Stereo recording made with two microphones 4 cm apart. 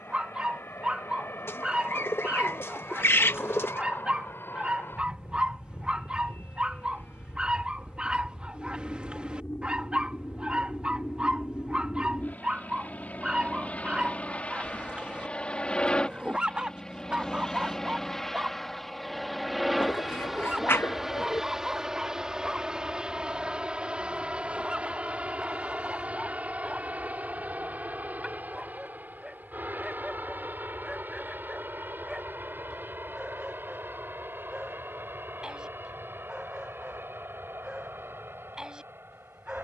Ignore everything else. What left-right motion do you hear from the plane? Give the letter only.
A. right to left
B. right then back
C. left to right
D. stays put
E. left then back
C.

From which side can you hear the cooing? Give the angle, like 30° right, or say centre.
70° left.